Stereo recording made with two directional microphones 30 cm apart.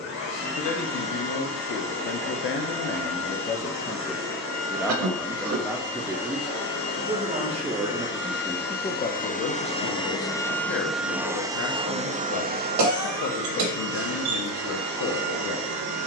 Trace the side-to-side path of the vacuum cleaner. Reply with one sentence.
In this clip you hear the vacuum cleaner move to the right.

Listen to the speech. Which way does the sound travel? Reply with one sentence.
You can hear the speech go right and come back.